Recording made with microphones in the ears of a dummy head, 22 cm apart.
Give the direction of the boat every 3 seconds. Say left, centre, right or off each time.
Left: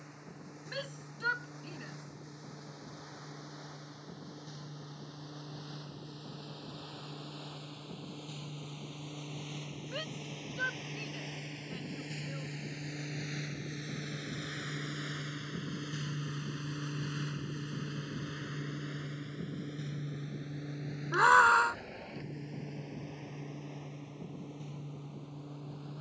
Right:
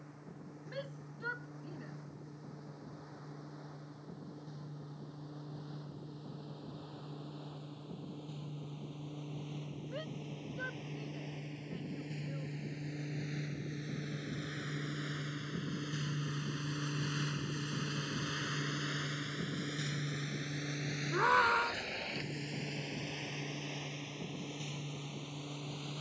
left, left, left, left, left, centre, right, right, right.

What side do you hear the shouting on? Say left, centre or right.
left.